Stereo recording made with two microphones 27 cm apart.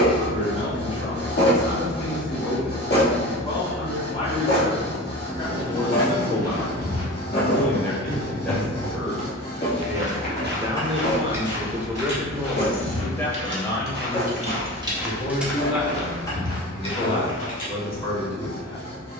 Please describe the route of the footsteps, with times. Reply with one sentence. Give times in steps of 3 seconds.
In this clip you hear the footsteps not at all from 0 s, on the left from 6 s, on the right from 9 s, on the left from 15 s and not at all from 18 s.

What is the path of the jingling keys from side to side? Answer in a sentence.
In this clip you hear the jingling keys move from left to right and back again.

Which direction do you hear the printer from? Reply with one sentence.
In this clip you hear the printer on the left.